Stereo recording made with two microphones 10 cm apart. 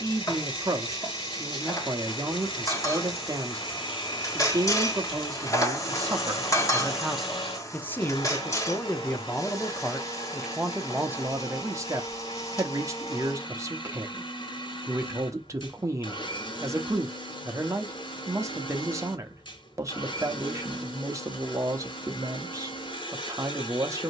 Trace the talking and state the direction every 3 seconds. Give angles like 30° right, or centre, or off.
40° right, 40° right, centre, 10° right, 30° right, 30° right, 30° right, 30° right.